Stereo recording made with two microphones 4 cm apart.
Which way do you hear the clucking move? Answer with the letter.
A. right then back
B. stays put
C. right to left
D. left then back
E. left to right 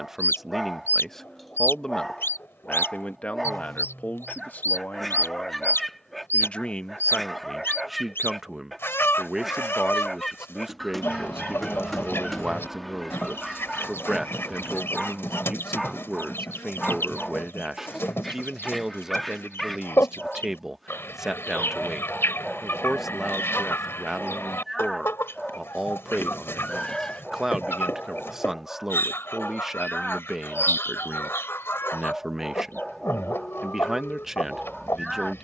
B.